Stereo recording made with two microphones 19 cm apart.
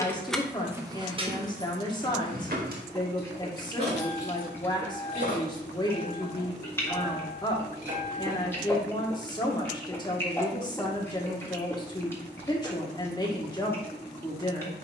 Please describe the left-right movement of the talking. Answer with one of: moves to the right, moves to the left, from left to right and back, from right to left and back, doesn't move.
doesn't move.